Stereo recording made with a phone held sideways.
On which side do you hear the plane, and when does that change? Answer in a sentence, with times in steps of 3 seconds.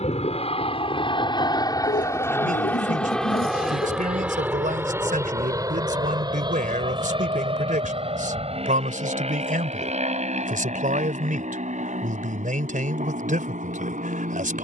You can hear the plane on the left from 0 s, in the centre from 3 s and on the right from 6 s.